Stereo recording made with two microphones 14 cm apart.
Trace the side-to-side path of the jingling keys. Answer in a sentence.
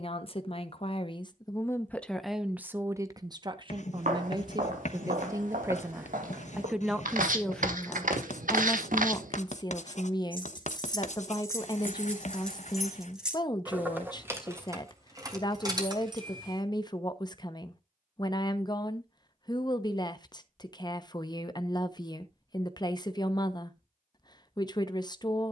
In this clip you hear the jingling keys move from left to right.